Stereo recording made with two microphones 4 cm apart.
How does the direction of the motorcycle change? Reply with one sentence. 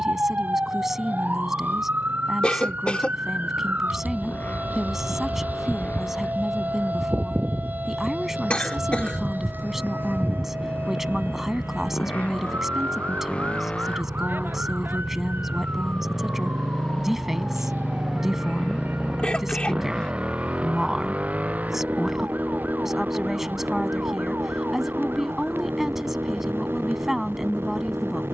In this clip you hear the motorcycle move from left to right.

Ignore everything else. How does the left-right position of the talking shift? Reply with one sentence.
In this clip you hear the talking stay in one place.